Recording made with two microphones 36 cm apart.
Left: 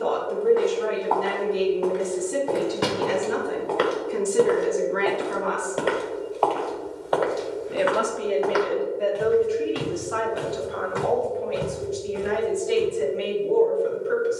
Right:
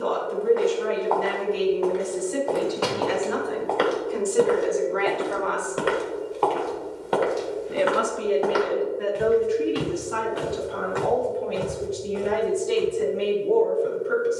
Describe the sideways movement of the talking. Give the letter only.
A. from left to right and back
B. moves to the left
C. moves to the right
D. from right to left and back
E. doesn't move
C.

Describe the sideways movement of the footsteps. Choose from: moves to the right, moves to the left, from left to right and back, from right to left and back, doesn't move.
from left to right and back.